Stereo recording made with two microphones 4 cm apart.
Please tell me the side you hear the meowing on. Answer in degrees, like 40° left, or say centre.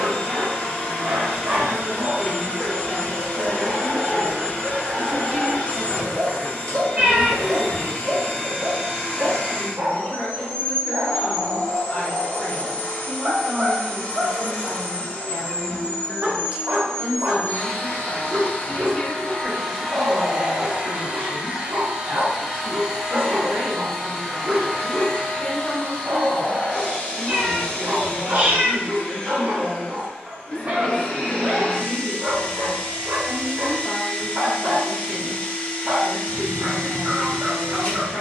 40° right.